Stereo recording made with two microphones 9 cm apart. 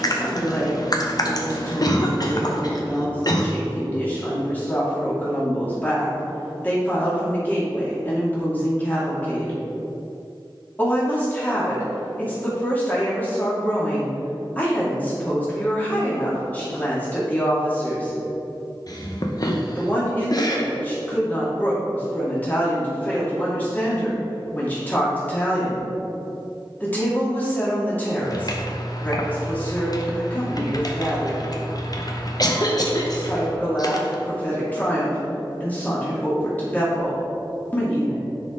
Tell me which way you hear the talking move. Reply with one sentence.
In this clip you hear the talking stay put.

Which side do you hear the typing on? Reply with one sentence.
In this clip you hear the typing on the left.